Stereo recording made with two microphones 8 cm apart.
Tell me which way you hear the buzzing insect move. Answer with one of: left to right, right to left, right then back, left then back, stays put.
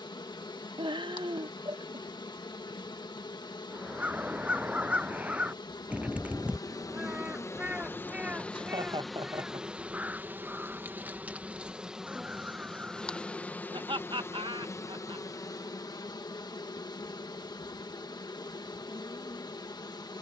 right then back.